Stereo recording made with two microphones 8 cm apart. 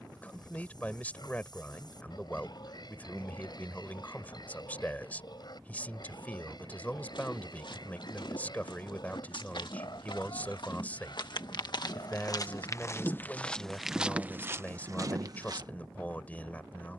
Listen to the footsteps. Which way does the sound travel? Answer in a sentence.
You can hear the footsteps travel towards the right.